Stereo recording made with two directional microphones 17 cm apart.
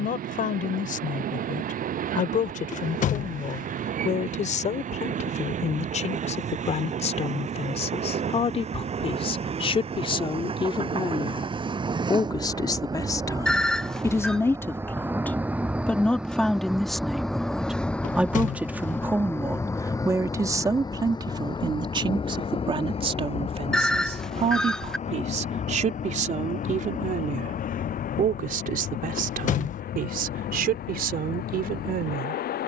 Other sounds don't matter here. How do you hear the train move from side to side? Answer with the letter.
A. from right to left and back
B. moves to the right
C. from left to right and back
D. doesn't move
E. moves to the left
E.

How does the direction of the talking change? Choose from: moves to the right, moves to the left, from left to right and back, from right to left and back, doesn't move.
moves to the right.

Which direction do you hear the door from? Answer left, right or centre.
left.